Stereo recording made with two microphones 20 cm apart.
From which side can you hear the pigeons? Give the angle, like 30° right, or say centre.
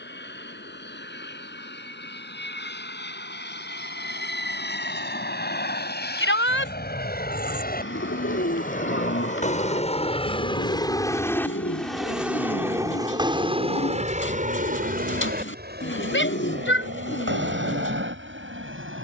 80° left.